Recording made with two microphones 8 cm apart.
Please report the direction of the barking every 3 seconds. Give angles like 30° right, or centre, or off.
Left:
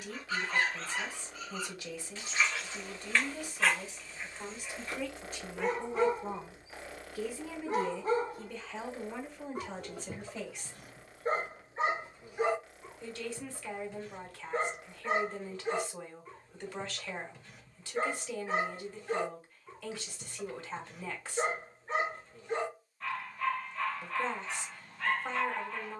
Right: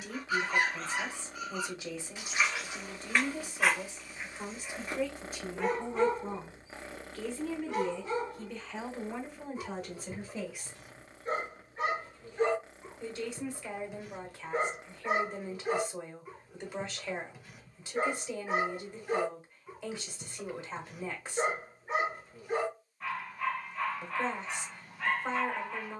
10° right, 10° right, 30° left, 50° left, centre, 10° right, 10° right, 10° right, 10° right.